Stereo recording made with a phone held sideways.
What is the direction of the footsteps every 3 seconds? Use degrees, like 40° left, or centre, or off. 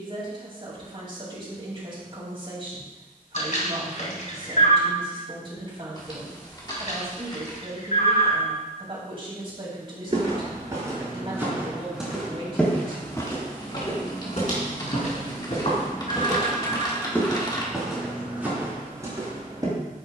off, off, off, 20° right, 30° left, 30° left, 20° right.